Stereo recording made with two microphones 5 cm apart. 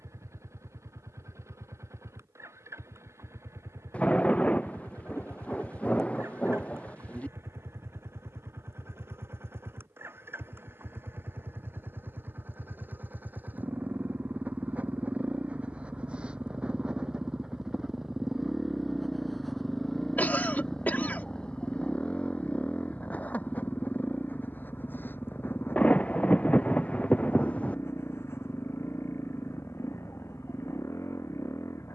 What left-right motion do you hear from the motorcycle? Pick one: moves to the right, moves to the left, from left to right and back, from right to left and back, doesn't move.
moves to the left.